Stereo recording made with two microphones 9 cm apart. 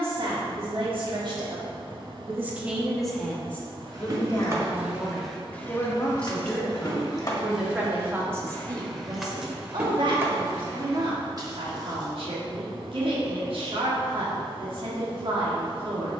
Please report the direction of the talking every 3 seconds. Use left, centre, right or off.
right, left, centre, right, right, right.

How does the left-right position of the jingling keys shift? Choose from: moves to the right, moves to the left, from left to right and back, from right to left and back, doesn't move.
from right to left and back.